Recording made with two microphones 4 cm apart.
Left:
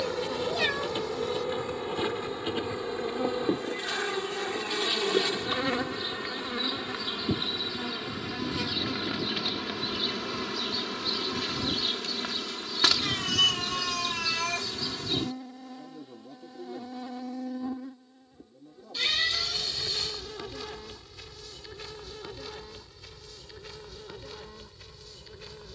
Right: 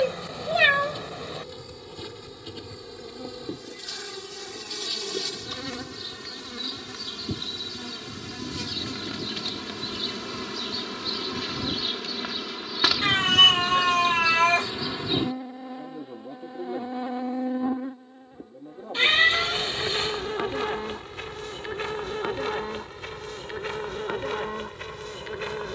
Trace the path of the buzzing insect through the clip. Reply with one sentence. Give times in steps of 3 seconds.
In this clip you hear the buzzing insect on the left from 0 s, in the centre from 9 s and on the right from 15 s.